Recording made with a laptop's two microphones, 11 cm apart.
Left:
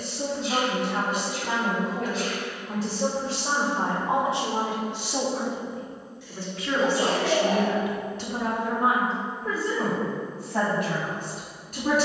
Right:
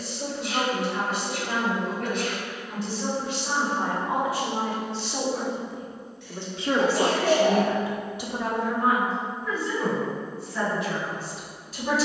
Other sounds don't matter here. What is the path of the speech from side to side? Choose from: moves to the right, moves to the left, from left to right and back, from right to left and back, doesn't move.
from left to right and back.